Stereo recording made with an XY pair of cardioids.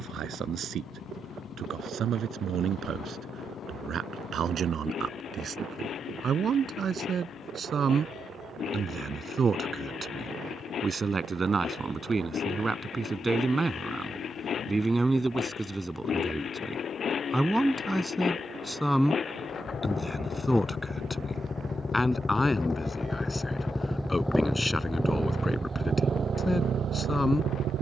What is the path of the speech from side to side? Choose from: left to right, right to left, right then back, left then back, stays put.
right to left.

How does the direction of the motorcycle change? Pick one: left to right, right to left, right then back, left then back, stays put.
left to right.